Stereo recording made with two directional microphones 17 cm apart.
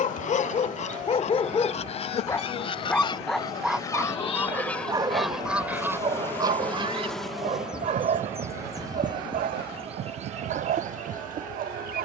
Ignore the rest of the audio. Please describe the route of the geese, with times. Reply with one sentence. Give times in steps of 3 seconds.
You can hear the geese on the left from 0 s, in the centre from 3 s and on the right from 6 s.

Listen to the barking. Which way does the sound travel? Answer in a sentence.
In this clip you hear the barking travel towards the right.